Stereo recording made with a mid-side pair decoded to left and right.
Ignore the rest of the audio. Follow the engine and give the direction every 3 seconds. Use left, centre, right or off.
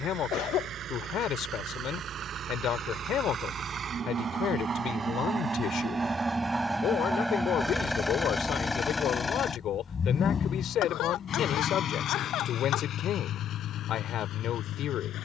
right, right, centre, left, left.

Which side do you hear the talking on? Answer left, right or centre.
left.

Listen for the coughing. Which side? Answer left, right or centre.
left.